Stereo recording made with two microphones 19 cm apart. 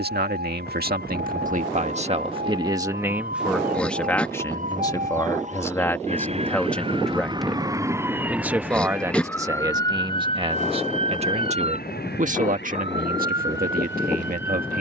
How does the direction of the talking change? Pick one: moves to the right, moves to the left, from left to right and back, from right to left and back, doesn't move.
from right to left and back.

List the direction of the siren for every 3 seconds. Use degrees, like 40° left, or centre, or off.
60° right, 50° right, 20° right, 30° left, 60° left.